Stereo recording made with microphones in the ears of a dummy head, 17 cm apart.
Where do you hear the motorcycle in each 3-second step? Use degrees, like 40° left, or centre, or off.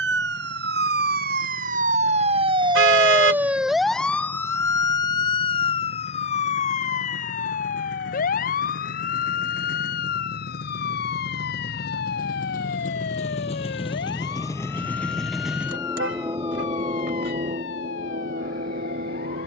80° left, 80° left, 70° left, 60° left, 30° left, 20° right, 50° right.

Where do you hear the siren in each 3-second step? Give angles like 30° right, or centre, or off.
50° right, 10° left, 40° left, 50° left, 60° left, 60° left, 60° left.